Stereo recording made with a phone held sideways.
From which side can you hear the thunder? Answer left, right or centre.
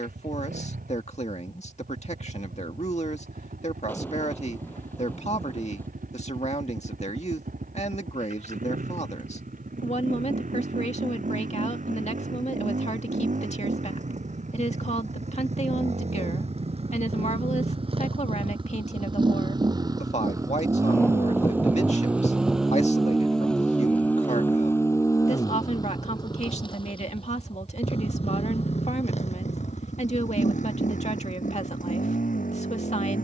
centre.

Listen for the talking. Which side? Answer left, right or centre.
left.